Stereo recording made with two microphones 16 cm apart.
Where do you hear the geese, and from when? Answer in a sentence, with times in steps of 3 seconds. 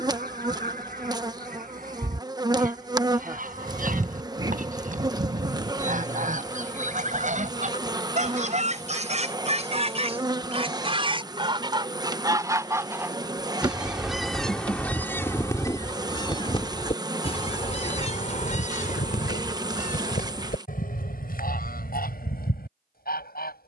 You can hear the geese on the right from 0 s, in the centre from 12 s and on the left from 15 s.